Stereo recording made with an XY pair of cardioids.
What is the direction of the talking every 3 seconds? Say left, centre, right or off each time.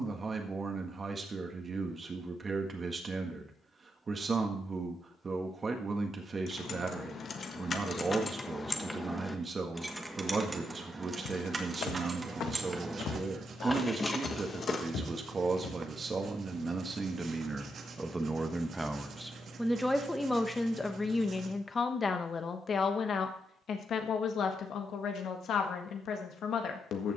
right, right, right, right, right, right, centre, left, left.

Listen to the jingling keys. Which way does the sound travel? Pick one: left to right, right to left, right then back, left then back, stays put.
right then back.